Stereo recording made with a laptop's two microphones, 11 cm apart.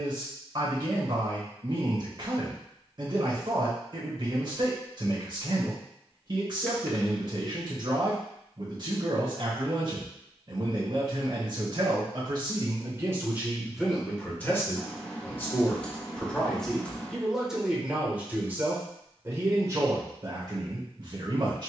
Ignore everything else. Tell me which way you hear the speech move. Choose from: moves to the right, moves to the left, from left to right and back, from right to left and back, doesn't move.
from right to left and back.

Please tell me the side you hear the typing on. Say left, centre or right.
centre.